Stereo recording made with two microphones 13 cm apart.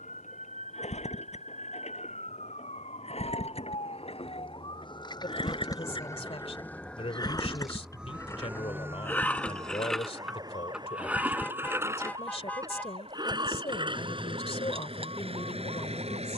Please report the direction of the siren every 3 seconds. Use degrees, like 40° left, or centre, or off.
70° left, 40° left, centre, 30° right, 50° right, 50° right.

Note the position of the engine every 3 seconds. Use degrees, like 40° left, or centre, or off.
60° left, 50° left, 30° left, centre, 40° right, 50° right.